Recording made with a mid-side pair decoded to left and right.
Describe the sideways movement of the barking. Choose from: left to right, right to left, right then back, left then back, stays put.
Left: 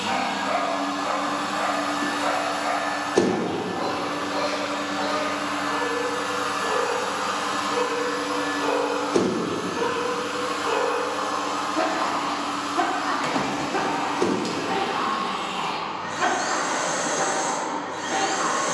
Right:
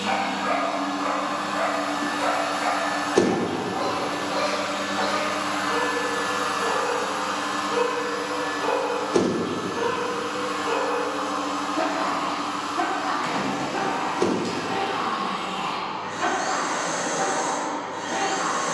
right to left.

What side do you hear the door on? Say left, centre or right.
centre.